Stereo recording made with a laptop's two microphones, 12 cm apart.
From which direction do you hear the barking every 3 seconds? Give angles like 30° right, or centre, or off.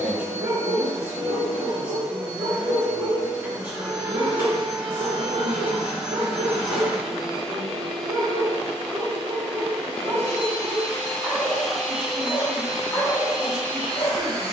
70° right, 70° right, 60° right, 30° right, 30° left.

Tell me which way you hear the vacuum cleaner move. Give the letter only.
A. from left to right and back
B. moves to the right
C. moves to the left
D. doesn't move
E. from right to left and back
E.